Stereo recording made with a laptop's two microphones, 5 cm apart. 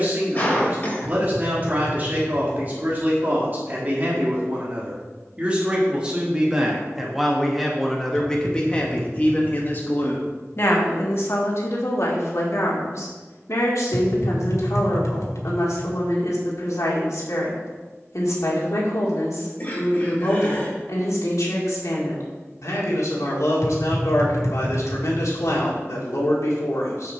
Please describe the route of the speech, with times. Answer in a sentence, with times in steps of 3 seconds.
You can hear the speech on the right from 0 s, in the centre from 6 s and on the left from 9 s.